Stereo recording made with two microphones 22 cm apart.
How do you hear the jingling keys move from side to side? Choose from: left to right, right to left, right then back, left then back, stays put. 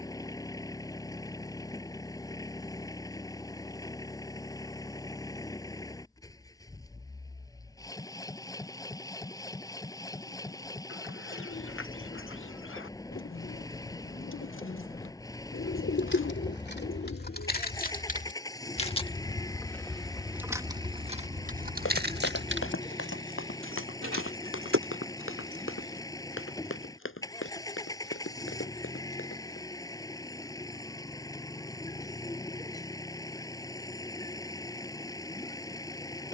left to right.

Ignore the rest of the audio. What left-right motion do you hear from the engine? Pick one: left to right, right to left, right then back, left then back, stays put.
stays put.